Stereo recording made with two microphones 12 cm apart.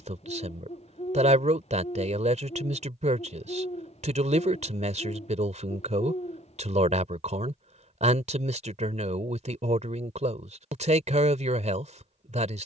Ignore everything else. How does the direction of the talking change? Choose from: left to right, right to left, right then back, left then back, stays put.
stays put.